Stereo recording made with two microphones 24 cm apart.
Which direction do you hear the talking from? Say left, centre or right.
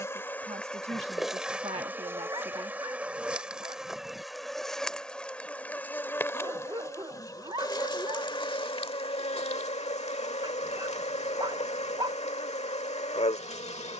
right.